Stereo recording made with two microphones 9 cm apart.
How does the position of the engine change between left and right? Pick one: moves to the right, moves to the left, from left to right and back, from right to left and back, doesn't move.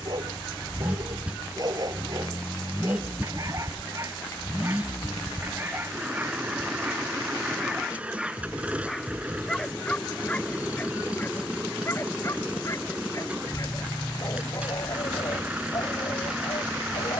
doesn't move.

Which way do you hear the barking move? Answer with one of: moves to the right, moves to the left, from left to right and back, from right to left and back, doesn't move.
moves to the left.